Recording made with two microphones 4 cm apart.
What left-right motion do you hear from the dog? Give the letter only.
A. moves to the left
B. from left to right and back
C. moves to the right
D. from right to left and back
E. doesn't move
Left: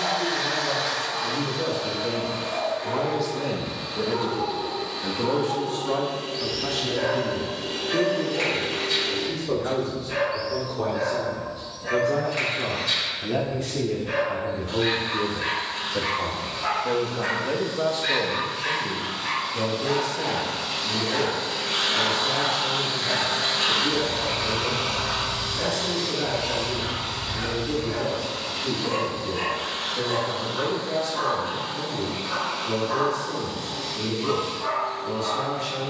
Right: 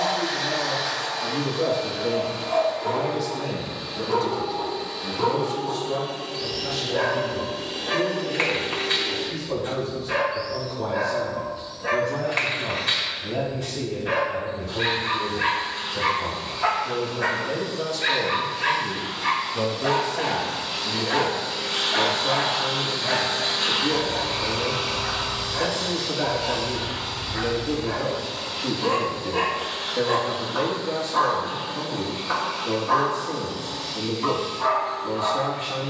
E.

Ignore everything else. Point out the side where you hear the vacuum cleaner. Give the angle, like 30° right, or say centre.
60° left.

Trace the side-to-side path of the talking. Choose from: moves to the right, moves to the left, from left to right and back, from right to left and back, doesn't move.
from right to left and back.